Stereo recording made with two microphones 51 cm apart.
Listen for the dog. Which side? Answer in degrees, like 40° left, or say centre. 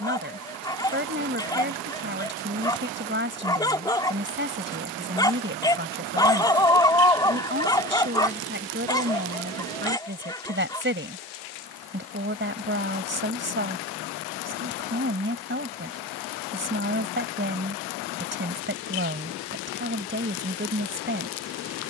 10° left.